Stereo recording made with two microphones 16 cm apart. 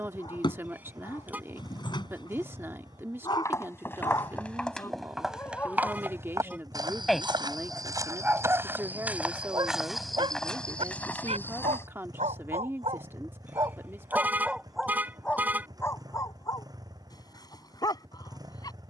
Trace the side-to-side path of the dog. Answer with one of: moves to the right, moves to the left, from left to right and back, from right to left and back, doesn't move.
from left to right and back.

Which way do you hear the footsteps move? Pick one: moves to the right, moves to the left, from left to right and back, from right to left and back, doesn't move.
from left to right and back.